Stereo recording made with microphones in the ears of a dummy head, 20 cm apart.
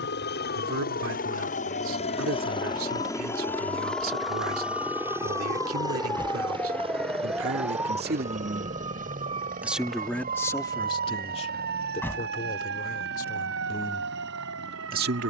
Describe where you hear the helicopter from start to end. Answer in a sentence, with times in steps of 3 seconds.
You can hear the helicopter on the left from 0 s, in the centre from 3 s and on the right from 6 s.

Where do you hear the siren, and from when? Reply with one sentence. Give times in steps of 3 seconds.
You can hear the siren on the left from 0 s, in the centre from 6 s and on the right from 9 s.